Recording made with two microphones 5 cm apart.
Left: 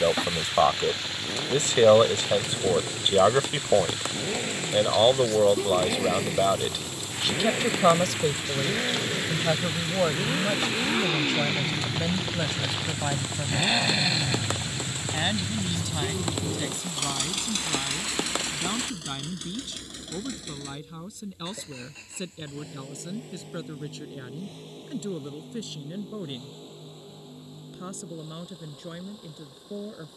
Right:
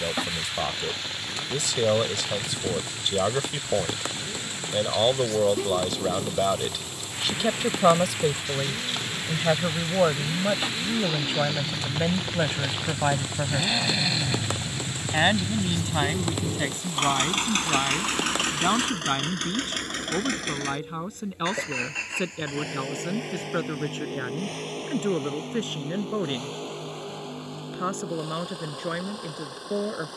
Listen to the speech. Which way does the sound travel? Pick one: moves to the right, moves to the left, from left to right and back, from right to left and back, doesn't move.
moves to the right.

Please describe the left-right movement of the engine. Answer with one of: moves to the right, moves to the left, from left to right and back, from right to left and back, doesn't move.
moves to the right.